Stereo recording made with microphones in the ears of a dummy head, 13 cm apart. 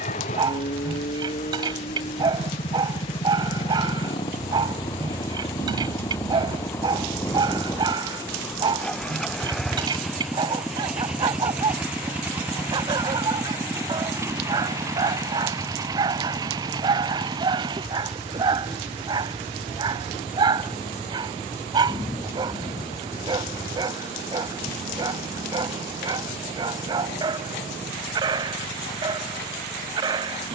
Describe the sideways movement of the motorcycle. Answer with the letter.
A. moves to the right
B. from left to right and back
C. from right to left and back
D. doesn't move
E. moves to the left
A.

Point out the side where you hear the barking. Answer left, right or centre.
right.